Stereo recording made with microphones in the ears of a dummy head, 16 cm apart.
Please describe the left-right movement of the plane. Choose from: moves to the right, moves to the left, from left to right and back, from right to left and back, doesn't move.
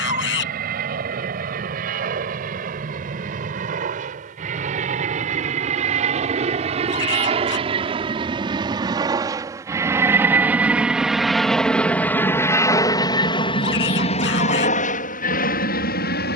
moves to the left.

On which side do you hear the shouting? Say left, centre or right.
left.